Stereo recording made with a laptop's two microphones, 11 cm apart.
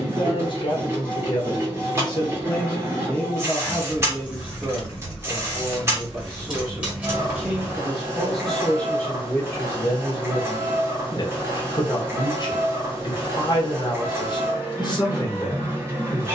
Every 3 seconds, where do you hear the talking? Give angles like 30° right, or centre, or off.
40° left, 20° right, 10° right, 40° left, 40° left, 40° left.